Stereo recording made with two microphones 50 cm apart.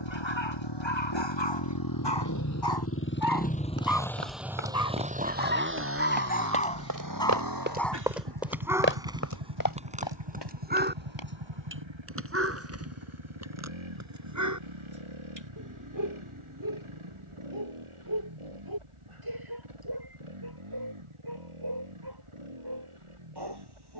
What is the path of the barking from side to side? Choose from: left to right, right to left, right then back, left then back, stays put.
left to right.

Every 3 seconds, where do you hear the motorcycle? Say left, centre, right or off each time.
left, centre, right, right, right, right, right, right.